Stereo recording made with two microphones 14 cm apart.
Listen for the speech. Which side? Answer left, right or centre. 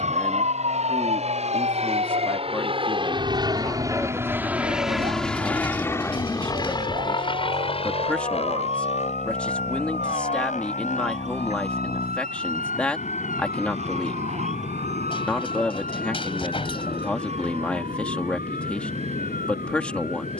centre.